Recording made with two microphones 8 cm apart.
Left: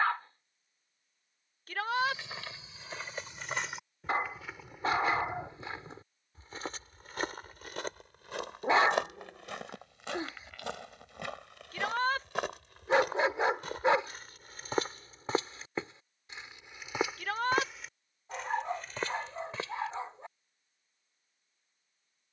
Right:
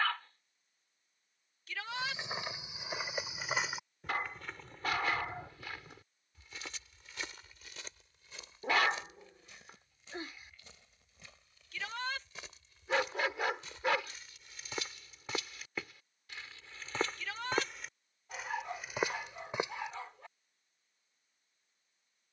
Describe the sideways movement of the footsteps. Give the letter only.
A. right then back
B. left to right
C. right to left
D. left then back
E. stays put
D.